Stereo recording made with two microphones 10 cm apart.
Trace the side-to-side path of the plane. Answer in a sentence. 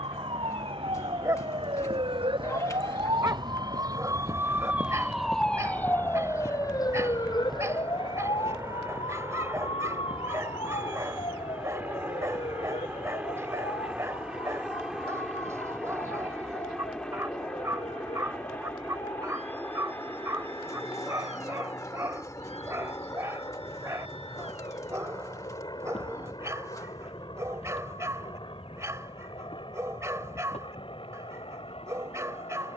You can hear the plane travel towards the left.